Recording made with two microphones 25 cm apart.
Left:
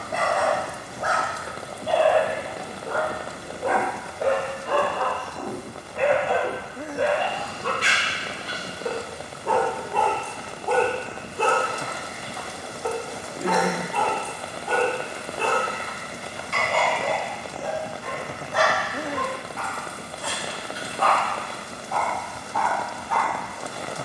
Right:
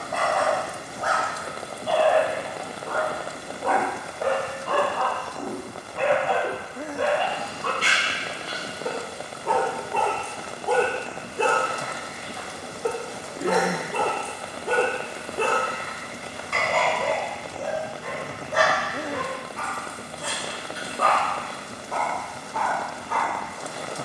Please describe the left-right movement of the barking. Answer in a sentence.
In this clip you hear the barking travel towards the right.